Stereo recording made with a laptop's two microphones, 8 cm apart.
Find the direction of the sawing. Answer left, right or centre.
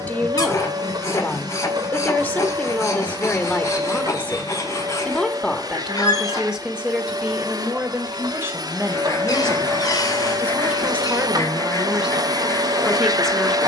left.